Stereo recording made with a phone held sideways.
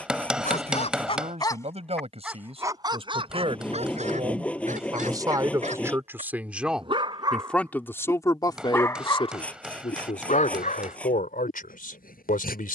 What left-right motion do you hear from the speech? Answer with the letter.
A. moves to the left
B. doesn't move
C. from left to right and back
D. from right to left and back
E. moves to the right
A.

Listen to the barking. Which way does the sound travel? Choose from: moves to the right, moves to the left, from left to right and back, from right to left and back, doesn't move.
from left to right and back.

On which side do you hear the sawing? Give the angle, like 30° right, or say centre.
10° left.